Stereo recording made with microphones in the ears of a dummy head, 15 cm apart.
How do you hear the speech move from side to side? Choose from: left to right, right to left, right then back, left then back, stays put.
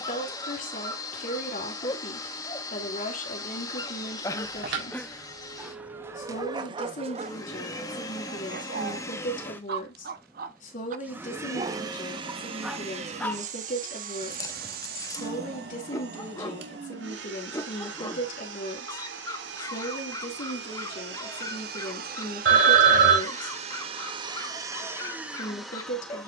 stays put.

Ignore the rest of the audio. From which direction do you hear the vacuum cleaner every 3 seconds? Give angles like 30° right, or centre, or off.
20° left, 20° left, 20° left, centre, 40° right, 70° right, 70° right, 50° right, 10° right.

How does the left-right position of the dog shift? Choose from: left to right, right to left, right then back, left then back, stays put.
right then back.